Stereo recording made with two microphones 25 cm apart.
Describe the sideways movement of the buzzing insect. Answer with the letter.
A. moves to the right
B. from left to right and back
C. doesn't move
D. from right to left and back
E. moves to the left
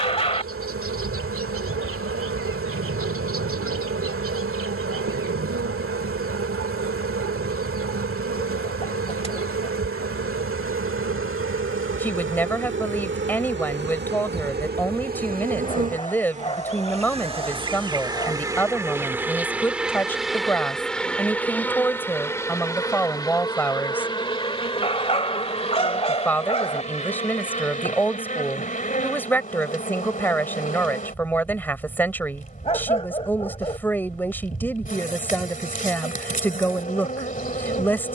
E.